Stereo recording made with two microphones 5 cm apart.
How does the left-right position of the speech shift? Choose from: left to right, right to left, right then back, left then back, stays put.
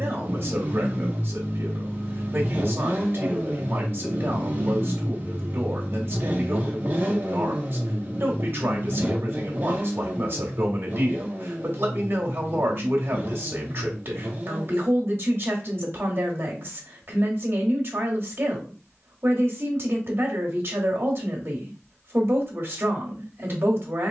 stays put.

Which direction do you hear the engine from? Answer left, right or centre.
right.